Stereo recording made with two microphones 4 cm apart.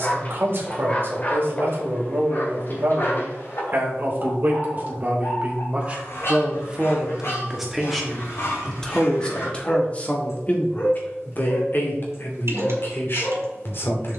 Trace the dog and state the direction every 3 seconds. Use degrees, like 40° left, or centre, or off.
40° left, 60° left, 60° left, 70° left, 70° left.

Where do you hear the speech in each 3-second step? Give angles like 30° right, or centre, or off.
50° right, 40° right, 10° right, 30° left, 50° left.